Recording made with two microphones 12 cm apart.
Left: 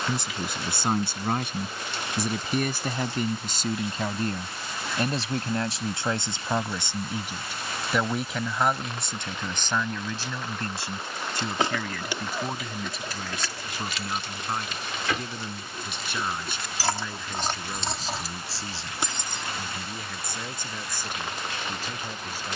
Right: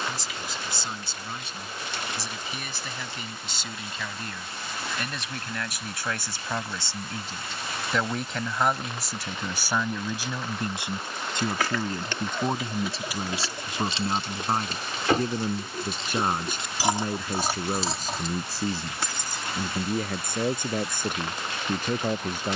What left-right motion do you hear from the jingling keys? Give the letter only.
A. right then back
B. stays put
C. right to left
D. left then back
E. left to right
A.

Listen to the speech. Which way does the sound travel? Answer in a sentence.
You can hear the speech go from the left side to the right.